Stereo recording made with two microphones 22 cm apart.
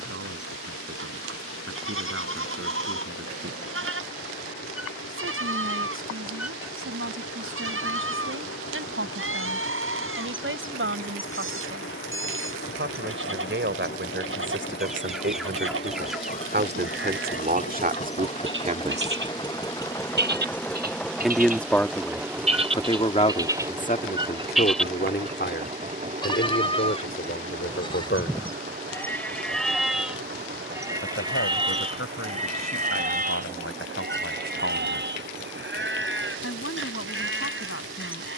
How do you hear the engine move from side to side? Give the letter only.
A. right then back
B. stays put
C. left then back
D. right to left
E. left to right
E.